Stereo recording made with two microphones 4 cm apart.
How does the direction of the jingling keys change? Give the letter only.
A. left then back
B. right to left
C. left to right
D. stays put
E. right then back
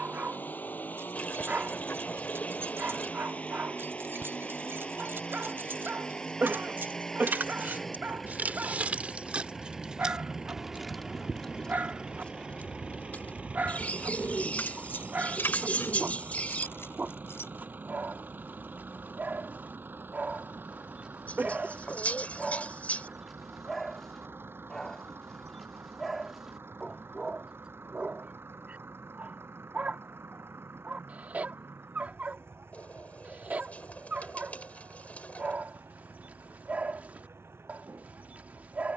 B.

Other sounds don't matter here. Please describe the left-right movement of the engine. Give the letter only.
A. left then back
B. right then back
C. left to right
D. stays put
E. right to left
C.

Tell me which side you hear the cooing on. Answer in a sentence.
You can hear the cooing on the left.